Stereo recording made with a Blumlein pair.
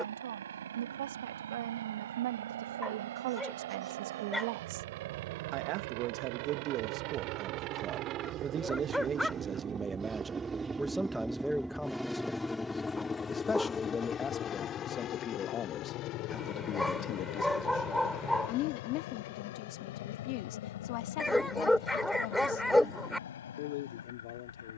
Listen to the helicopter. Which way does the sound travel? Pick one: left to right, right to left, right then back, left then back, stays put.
right to left.